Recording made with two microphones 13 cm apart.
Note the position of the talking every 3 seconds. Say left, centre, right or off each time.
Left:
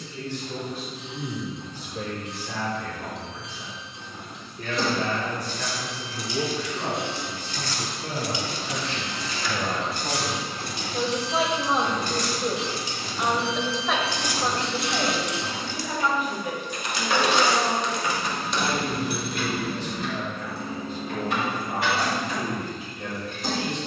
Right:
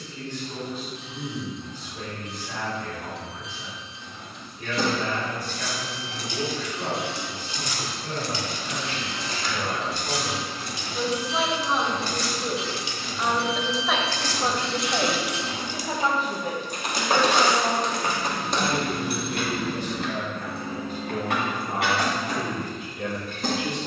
left, left, left, left, centre, right, right, right.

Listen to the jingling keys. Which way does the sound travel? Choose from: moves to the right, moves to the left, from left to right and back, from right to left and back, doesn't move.
from right to left and back.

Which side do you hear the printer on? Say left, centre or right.
left.